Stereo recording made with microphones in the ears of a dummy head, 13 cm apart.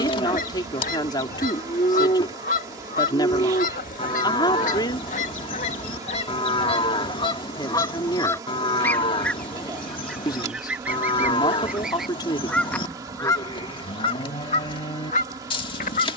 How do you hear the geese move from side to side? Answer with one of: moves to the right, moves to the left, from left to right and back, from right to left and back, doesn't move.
from left to right and back.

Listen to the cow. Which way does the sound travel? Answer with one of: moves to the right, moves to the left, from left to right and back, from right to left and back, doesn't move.
doesn't move.